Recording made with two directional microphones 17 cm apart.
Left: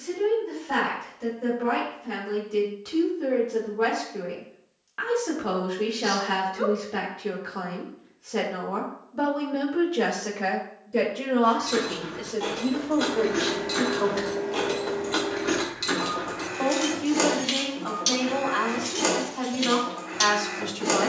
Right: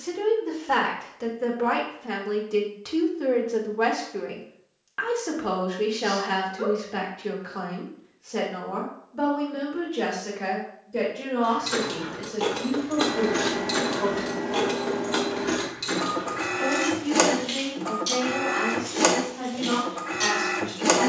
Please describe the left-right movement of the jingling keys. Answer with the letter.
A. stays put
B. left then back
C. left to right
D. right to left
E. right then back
D.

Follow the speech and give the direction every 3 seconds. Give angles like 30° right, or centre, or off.
50° right, 20° right, centre, 20° left, 30° left, 40° left, 40° left.